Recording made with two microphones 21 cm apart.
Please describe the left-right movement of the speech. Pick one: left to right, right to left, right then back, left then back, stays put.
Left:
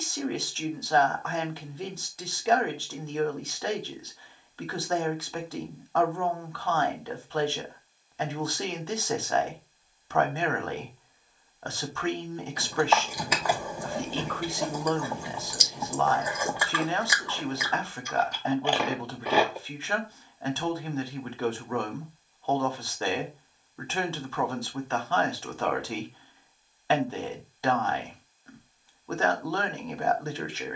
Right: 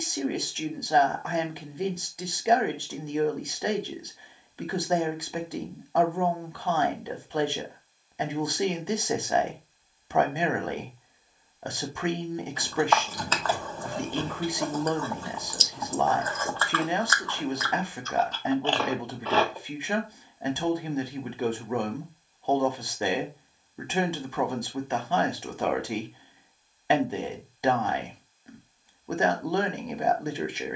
stays put.